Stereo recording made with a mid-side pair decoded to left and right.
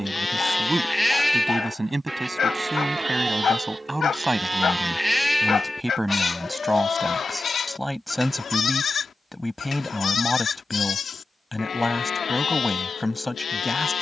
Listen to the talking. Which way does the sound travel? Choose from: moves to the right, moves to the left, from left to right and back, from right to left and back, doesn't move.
moves to the left.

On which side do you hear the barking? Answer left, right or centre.
left.